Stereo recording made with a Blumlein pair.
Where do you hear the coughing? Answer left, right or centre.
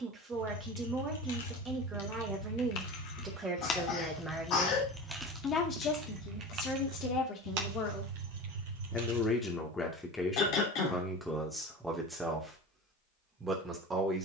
left.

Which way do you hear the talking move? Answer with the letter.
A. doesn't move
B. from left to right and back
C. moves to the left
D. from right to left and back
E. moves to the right
D.